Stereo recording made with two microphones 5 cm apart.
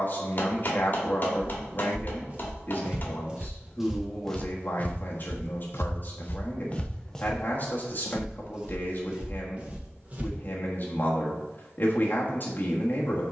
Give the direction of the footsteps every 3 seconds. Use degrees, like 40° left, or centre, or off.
30° right, 20° left, 10° left, 30° right, off.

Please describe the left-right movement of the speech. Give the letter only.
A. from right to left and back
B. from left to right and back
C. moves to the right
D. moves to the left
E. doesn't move
E.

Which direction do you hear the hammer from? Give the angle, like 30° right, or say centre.
40° left.